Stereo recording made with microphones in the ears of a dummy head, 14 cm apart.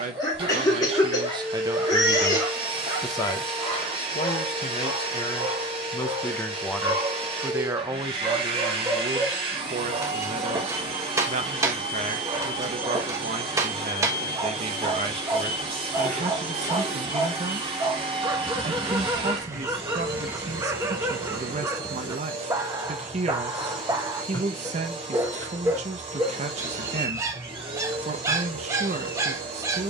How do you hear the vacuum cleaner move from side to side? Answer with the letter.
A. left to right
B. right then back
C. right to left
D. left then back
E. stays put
E.